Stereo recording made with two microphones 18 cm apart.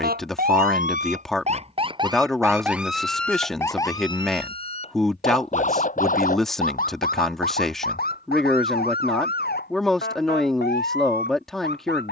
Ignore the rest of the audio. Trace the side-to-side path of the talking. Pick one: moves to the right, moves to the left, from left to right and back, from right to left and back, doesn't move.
doesn't move.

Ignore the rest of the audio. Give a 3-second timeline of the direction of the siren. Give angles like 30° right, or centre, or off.
40° right, 30° left, 50° left, 60° left.